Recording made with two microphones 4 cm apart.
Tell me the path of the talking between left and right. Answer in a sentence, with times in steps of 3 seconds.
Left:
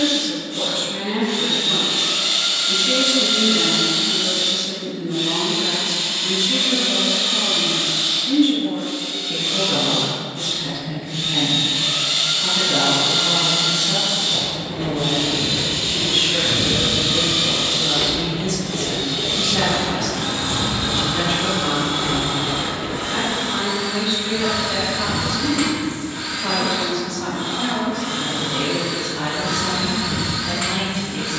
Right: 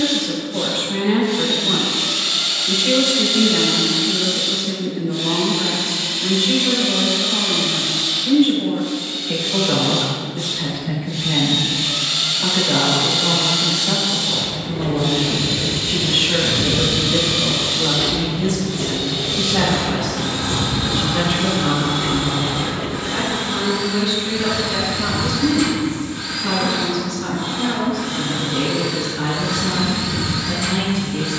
You can hear the talking on the right from 0 s, in the centre from 21 s and on the left from 24 s.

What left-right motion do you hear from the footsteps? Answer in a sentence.
You can hear the footsteps move to the right.